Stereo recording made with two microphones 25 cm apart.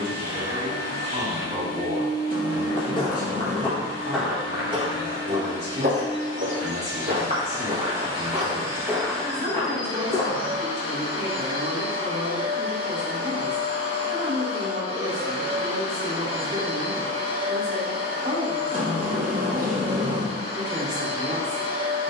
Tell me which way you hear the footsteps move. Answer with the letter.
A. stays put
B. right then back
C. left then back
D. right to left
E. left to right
B.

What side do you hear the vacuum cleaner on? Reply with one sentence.
In this clip you hear the vacuum cleaner on the right.